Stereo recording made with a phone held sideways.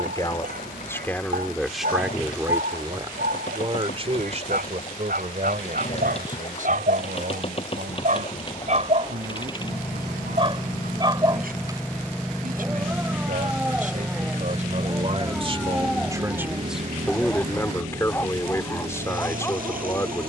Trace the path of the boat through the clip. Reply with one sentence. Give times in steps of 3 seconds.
In this clip you hear the boat on the left from 0 s, in the centre from 12 s and on the right from 15 s.